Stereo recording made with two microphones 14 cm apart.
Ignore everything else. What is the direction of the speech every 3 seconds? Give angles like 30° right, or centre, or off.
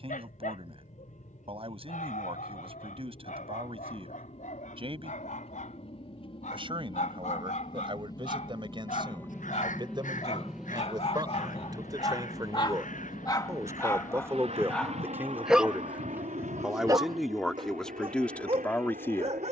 40° right, 40° right, 40° right, 30° right, 20° right, centre, 10° left.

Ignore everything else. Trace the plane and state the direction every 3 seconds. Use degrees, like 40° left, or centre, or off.
60° left, 50° left, 30° left, centre, 40° right, 60° right, 70° right.